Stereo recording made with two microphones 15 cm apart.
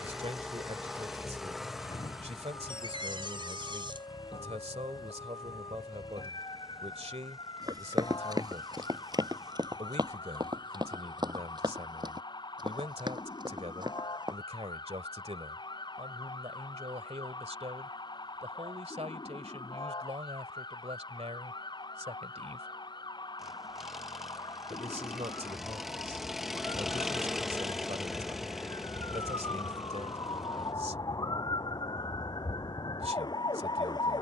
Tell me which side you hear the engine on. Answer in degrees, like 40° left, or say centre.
centre.